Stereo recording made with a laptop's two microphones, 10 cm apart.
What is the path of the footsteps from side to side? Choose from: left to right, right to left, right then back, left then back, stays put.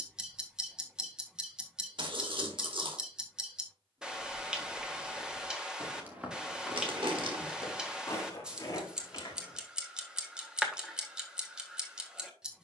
right to left.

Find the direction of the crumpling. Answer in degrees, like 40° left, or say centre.
60° right.